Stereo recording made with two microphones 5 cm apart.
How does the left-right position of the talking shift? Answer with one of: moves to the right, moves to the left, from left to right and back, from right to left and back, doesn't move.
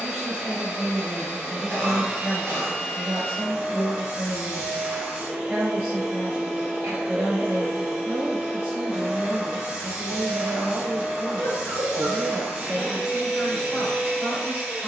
doesn't move.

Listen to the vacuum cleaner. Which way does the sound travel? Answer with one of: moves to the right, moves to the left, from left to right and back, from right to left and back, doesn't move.
doesn't move.